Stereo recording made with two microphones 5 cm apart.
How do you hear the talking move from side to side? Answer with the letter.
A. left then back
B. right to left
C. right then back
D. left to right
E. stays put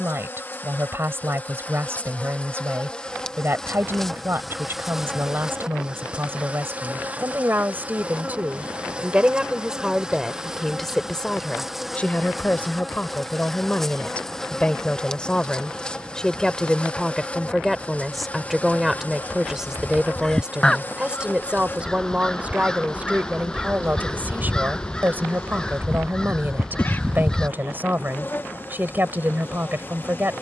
A.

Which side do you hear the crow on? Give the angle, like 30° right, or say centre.
10° left.